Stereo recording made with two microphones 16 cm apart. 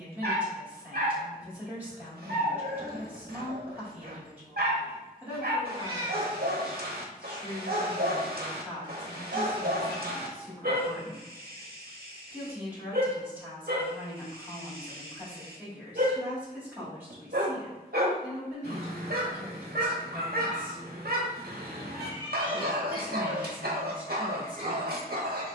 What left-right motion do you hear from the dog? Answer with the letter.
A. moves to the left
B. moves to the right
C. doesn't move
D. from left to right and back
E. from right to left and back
C.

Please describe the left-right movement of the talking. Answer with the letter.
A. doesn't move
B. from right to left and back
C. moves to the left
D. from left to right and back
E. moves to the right
A.